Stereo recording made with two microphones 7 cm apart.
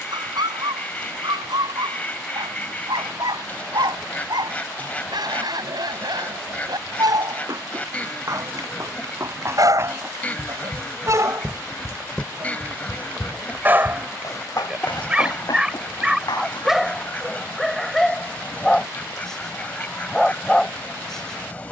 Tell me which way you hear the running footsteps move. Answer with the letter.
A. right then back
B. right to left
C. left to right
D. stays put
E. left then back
B.